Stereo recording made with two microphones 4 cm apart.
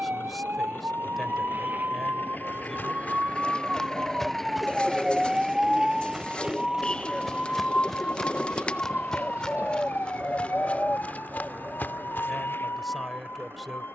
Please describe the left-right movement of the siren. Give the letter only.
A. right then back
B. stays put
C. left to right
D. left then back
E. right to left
E.